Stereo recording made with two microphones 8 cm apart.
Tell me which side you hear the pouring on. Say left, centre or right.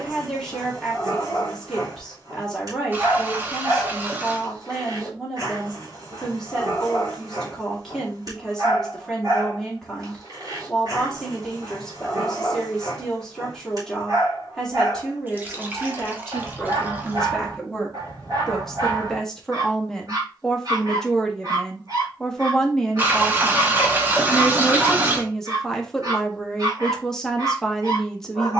right.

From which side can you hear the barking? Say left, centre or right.
right.